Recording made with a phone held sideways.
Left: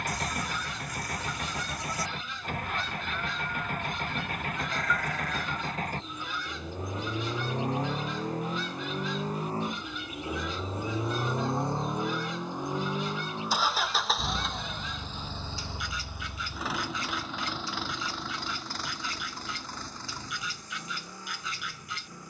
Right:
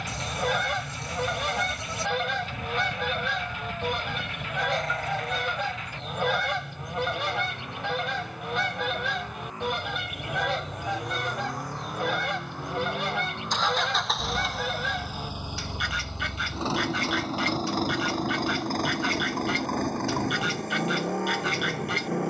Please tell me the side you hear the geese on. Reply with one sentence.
In this clip you hear the geese on the right.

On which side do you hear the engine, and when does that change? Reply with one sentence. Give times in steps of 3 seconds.
You can hear the engine on the left from 0 s, in the centre from 12 s and on the right from 15 s.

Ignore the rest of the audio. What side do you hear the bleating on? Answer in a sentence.
In this clip you hear the bleating on the right.